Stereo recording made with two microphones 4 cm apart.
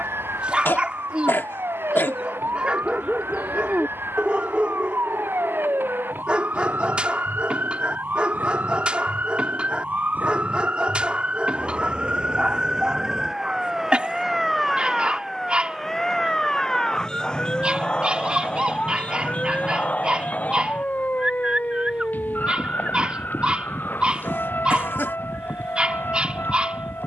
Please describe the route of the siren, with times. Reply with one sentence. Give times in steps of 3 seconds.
You can hear the siren on the right from 0 s, in the centre from 12 s and on the left from 18 s.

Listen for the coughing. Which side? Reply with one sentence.
In this clip you hear the coughing on the left.